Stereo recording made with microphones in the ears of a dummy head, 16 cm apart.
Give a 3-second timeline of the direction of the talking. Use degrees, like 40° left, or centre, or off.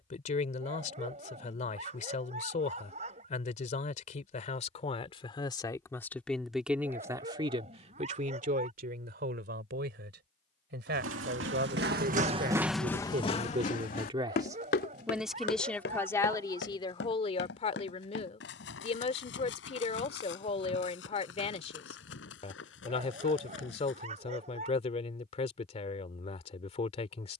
40° left, 40° left, 30° right, 60° right, 40° right, 20° left, 40° left, 40° left, 40° left.